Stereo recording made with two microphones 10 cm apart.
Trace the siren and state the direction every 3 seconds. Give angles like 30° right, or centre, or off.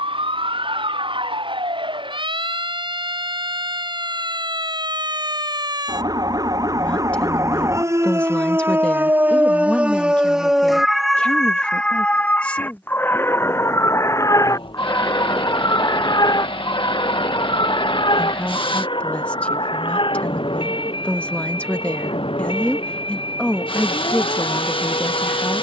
60° right, 50° right, 30° right, 10° right, 20° left, 50° left, 60° left, 60° left, 70° left.